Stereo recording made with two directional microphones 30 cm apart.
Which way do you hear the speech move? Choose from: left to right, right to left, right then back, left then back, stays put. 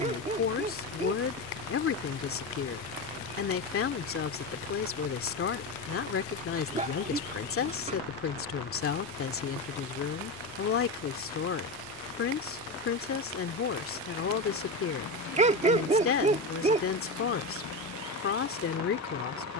stays put.